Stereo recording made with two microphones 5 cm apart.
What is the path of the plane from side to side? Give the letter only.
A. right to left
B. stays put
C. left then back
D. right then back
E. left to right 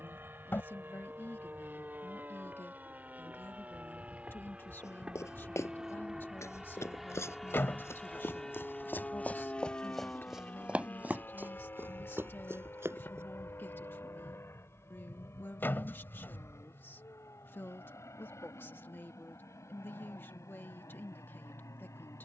A.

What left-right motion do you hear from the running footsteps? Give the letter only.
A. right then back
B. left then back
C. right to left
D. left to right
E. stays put
D.